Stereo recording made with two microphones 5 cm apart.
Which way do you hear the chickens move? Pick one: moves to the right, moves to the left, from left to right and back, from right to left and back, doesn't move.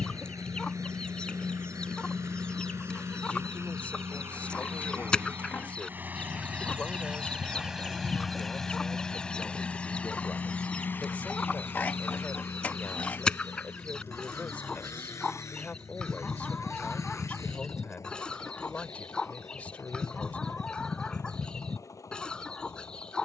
doesn't move.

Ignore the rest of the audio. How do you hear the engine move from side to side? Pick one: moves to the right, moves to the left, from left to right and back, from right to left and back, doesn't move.
moves to the left.